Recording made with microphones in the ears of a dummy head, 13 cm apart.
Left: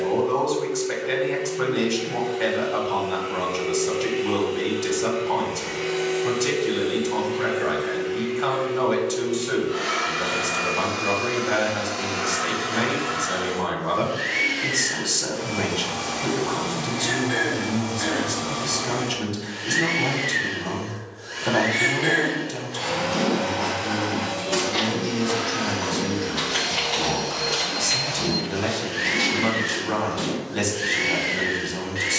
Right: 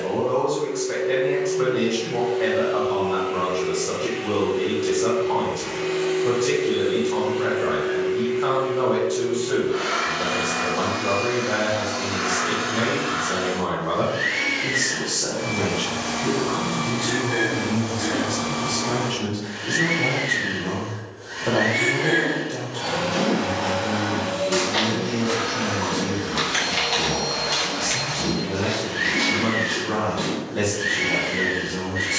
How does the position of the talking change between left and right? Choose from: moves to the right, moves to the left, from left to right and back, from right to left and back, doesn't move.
doesn't move.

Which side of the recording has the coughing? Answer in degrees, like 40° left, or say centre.
50° left.